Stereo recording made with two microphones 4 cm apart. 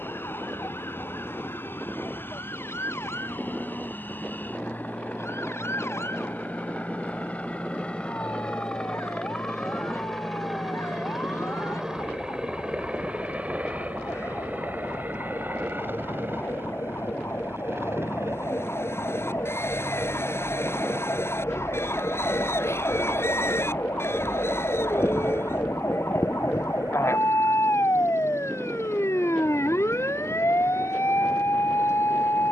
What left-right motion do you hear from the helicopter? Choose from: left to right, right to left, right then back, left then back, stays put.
left to right.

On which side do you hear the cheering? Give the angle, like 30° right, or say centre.
70° left.